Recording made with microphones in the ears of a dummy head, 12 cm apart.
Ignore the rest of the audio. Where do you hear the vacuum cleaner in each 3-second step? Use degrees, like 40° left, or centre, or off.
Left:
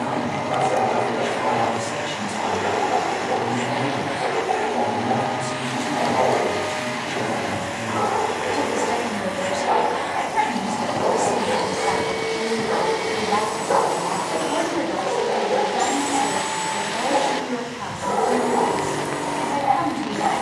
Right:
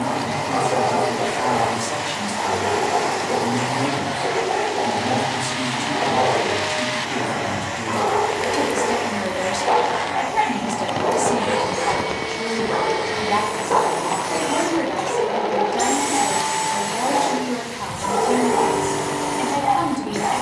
60° left, 60° left, 60° left, 60° left, 20° left, 20° right, 20° right.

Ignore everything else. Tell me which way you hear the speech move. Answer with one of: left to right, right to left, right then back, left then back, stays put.
stays put.